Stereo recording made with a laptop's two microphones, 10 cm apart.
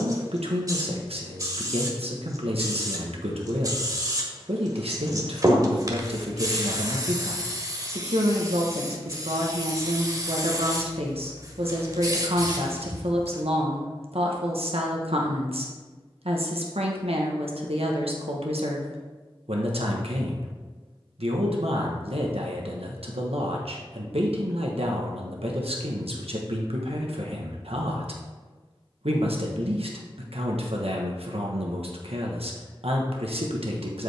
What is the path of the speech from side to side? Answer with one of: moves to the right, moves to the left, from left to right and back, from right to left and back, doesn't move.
doesn't move.